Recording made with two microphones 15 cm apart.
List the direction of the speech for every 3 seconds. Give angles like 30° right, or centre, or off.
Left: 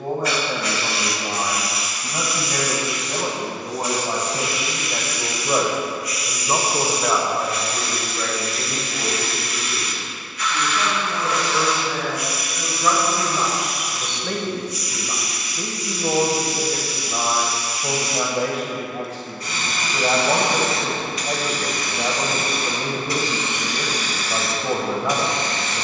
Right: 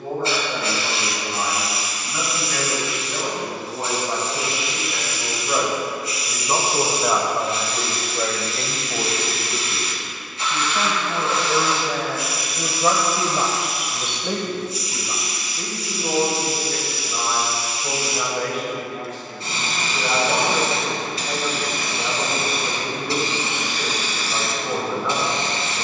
50° left, 40° left, 20° right, 50° right, 20° right, 30° left, 40° left, 40° left, 40° left.